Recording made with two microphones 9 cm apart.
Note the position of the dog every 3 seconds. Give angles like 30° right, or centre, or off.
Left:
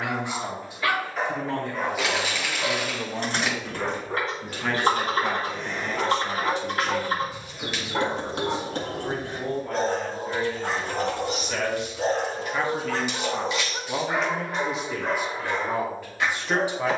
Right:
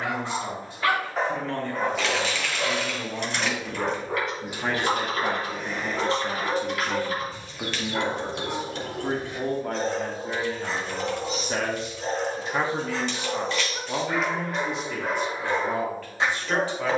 30° right, 10° right, 20° left, 50° left, 30° left, 20° right.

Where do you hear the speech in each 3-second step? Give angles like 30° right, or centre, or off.
10° left, 20° right, 40° right, 50° right, 10° right, 10° left.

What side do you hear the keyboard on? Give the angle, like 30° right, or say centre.
40° left.